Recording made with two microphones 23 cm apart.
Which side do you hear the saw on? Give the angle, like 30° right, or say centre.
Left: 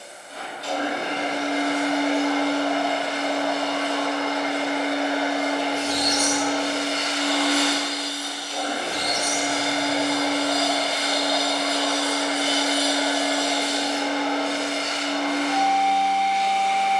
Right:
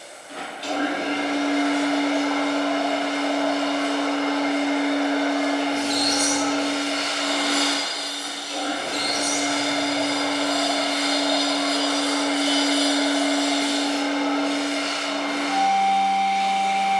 50° right.